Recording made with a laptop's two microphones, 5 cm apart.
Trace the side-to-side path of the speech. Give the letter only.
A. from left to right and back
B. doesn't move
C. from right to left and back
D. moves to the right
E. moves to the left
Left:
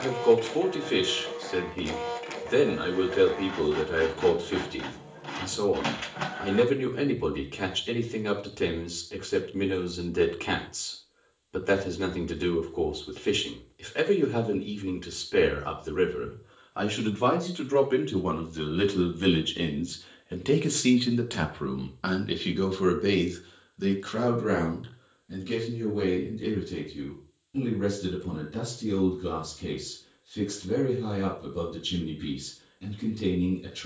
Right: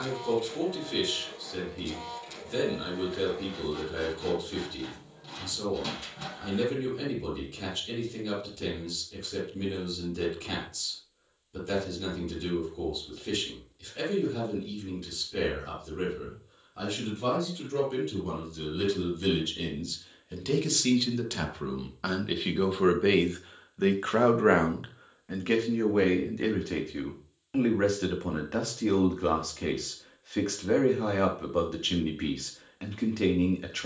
D.